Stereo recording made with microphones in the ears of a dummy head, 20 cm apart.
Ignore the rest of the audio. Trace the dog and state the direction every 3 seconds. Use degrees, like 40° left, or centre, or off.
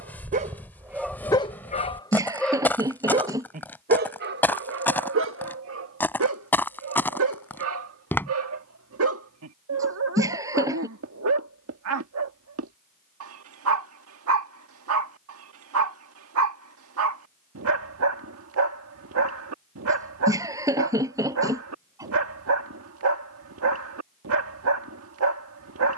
centre, 50° right, 70° right, 70° right, 70° right, 70° right, 70° right, 70° right, 70° right.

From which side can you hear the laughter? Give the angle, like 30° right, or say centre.
10° right.